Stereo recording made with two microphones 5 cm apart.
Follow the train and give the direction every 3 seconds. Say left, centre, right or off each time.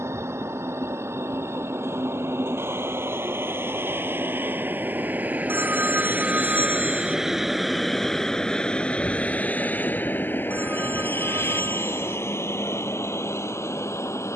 right, right, centre, left, left.